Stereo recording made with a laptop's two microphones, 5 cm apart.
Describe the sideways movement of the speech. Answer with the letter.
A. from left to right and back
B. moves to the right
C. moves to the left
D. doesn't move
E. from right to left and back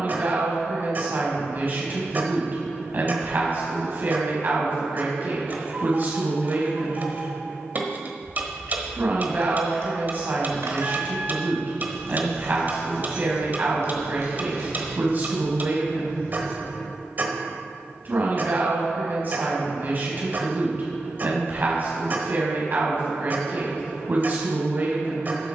D.